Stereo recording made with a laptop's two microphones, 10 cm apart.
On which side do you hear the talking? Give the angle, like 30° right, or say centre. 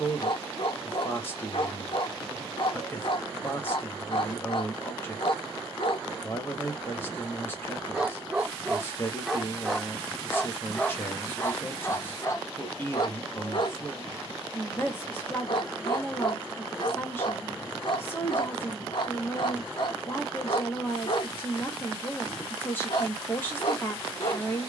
20° left.